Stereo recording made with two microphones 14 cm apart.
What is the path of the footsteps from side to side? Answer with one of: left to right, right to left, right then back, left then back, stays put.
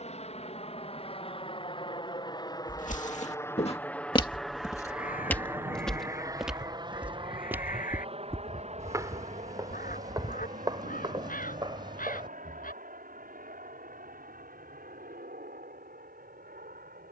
left to right.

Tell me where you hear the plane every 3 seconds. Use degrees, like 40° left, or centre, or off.
40° left, centre, 40° right, 50° right, 60° right, 70° right.